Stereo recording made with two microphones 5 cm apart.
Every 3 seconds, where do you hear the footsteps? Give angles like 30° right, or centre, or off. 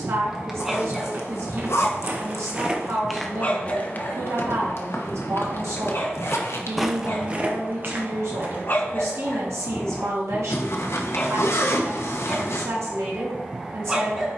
30° right, 40° left, 20° right, off, off.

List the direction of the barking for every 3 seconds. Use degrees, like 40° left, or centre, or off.
10° left, 50° left, 50° left, 30° left, 10° right.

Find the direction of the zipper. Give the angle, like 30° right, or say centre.
70° left.